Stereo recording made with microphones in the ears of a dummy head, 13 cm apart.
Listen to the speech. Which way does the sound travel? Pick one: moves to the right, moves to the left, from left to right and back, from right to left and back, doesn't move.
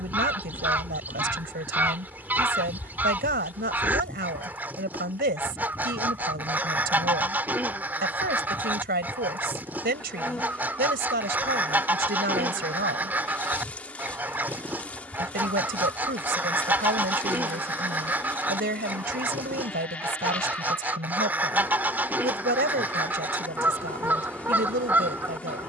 doesn't move.